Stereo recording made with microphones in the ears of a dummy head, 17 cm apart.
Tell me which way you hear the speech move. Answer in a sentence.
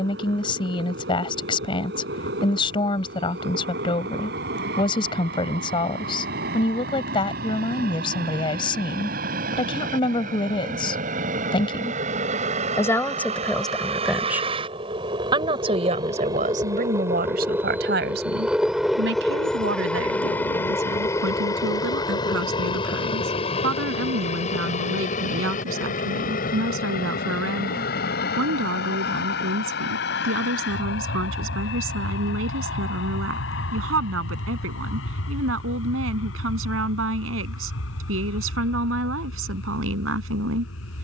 You can hear the speech travel towards the right.